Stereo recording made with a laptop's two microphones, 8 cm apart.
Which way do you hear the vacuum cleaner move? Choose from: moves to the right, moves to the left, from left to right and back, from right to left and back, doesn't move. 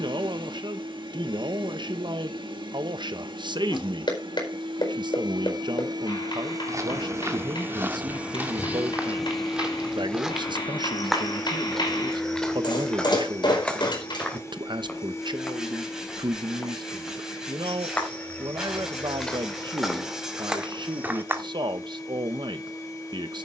moves to the left.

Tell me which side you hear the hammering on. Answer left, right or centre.
left.